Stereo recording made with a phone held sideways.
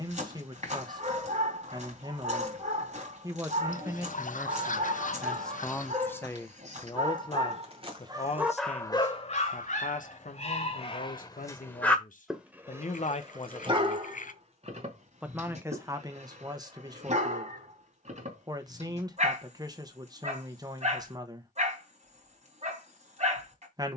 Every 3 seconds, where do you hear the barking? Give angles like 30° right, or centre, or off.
50° right, 50° right, 30° right, 40° left, 30° right, 50° right, 50° right, 50° right.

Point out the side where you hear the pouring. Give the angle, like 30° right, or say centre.
60° left.